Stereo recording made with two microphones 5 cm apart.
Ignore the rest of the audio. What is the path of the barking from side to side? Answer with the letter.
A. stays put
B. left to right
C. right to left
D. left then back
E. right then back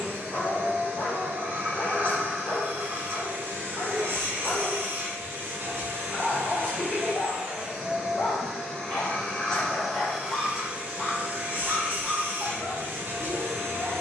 B.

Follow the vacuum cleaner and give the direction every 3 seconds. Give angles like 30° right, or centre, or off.
50° right, 50° right, 20° right, 20° right, 50° right.